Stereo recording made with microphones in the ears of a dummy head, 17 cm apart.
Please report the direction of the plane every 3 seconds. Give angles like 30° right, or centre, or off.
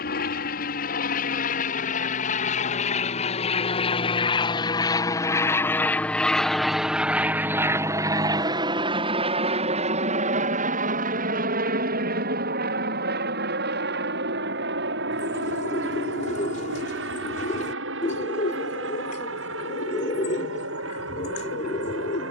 50° left, 30° left, 10° right, 40° right, 60° right, 60° right, 70° right, 70° right.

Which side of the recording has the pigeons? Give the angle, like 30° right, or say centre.
40° left.